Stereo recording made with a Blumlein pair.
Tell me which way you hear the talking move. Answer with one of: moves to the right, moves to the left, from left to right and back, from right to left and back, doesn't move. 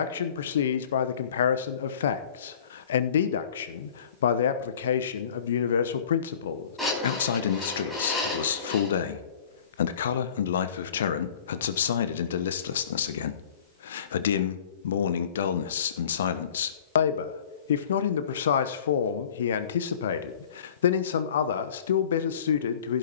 doesn't move.